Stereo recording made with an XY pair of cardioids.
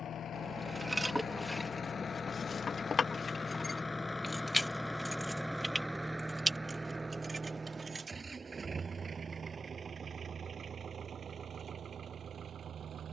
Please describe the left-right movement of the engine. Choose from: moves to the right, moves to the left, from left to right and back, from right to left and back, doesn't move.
moves to the right.